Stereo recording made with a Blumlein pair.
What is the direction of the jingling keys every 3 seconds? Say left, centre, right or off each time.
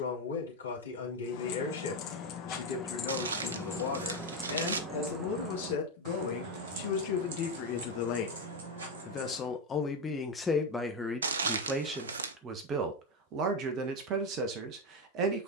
left, centre, right, right, off.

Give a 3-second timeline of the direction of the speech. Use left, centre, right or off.
left, left, left, centre, right.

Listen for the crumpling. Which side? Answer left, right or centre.
right.